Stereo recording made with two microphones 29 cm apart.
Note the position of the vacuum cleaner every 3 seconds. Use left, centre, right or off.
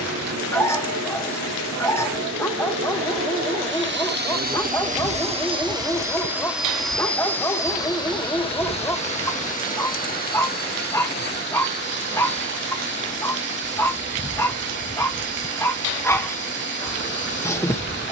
right, right, centre, left, left, left.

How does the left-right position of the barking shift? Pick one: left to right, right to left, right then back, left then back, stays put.
stays put.